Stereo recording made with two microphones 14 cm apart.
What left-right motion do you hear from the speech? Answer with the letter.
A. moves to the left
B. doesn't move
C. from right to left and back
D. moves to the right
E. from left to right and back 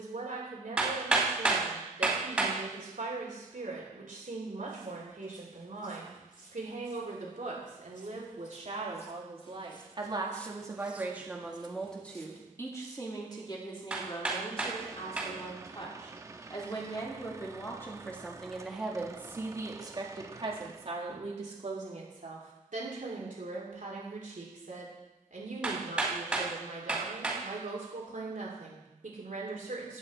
C.